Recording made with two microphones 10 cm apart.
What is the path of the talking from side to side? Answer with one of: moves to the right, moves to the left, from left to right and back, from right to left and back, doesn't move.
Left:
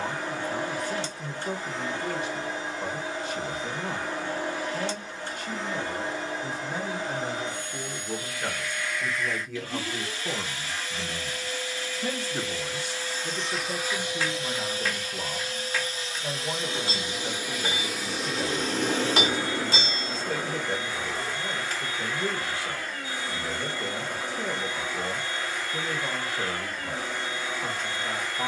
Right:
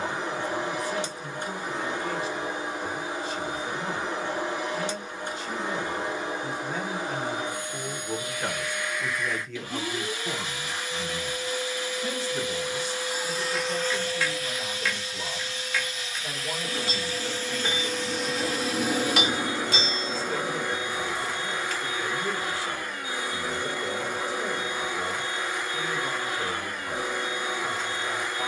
from left to right and back.